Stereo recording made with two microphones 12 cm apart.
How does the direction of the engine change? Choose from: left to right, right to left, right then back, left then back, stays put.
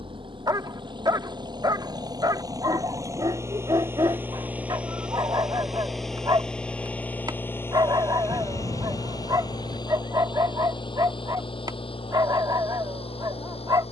right to left.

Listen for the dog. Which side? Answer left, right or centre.
right.